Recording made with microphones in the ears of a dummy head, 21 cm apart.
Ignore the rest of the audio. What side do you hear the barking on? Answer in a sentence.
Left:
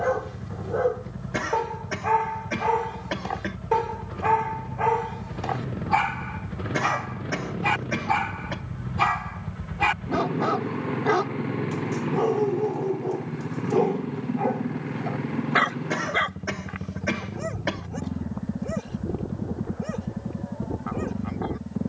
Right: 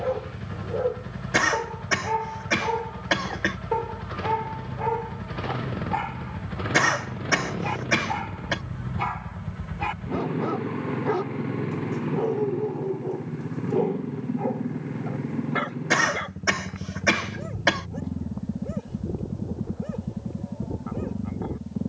In this clip you hear the barking on the left.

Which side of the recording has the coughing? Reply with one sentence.
You can hear the coughing on the right.